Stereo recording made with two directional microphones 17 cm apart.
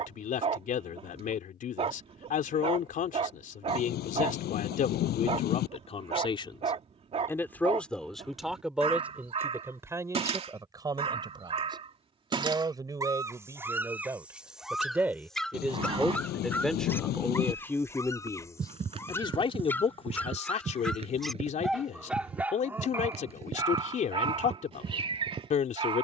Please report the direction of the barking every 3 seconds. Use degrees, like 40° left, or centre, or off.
40° right, 40° right, 40° right, 40° right, 10° right, 10° left, 10° left, 10° right, 30° right.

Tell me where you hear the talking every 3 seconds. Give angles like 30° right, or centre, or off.
50° left, 50° left, 10° left, 20° right, 20° right, centre, 30° left, 50° left, 50° left.